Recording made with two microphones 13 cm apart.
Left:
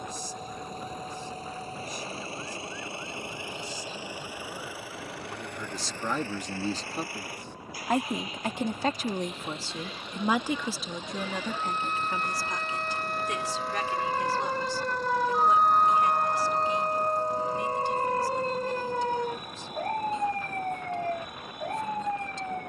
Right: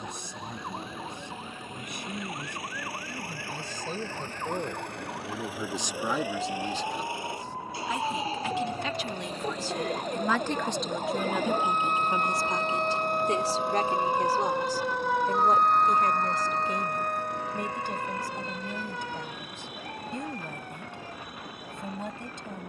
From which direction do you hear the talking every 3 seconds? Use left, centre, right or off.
right, right, left, centre, right, right, right, right.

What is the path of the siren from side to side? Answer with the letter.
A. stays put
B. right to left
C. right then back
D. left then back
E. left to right
B.